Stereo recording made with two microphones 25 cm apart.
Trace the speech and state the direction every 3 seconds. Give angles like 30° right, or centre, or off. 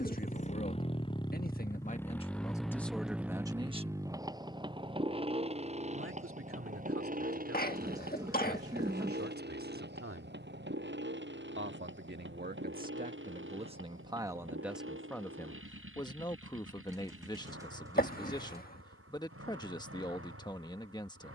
30° left, 20° right, 60° right, 60° right, 20° right, 20° left, 20° left.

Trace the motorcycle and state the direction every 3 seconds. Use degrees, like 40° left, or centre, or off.
10° left, 20° right, 30° right, 40° right, 50° right, 50° right, 60° right.